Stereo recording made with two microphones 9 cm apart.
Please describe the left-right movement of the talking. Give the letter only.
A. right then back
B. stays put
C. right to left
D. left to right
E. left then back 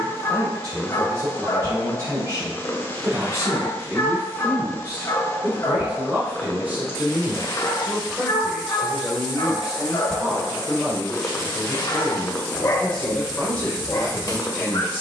C.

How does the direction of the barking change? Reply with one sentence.
You can hear the barking stay put.